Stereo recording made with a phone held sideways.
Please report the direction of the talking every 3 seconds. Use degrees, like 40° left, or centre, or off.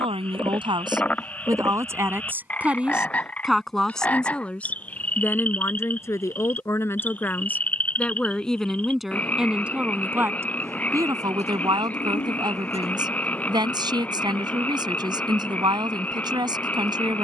20° right, 10° left, 10° left, 20° right, 30° right, 30° right.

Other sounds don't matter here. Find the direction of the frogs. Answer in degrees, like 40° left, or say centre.
10° left.